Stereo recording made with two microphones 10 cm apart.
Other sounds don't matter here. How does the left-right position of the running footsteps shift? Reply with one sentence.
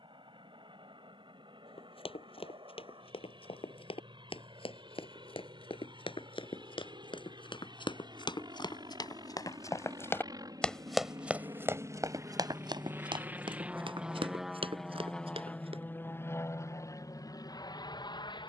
In this clip you hear the running footsteps go from the left side to the right.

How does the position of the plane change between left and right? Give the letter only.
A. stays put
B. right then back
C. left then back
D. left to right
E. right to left
E.